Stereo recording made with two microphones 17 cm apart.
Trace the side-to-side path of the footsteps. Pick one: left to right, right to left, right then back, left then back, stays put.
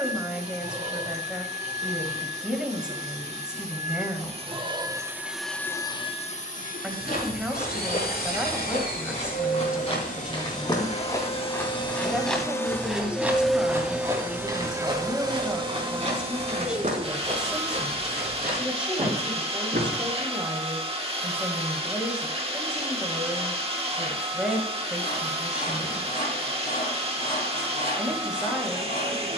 left to right.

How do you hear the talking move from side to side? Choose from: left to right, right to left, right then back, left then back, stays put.
stays put.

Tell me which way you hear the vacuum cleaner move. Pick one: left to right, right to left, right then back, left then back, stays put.
left then back.